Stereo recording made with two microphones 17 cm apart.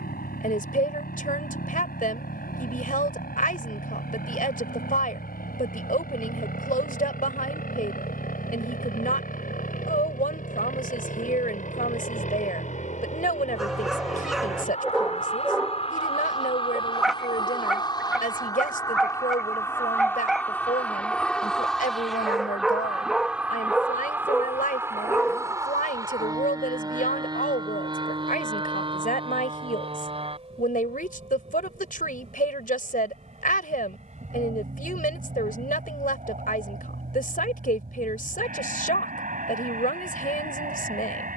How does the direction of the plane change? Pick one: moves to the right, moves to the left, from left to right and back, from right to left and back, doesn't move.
moves to the right.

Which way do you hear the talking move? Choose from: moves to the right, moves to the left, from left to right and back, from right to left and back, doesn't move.
doesn't move.